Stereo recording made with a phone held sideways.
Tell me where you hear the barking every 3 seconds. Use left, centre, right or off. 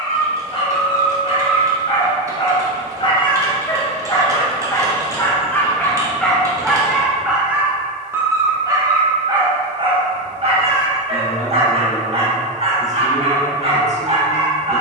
left, left, centre, right, right.